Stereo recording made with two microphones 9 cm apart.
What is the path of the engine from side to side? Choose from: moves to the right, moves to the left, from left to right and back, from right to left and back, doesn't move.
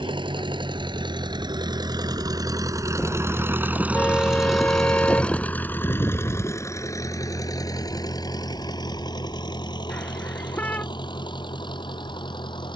moves to the left.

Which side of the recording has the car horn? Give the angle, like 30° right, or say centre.
20° left.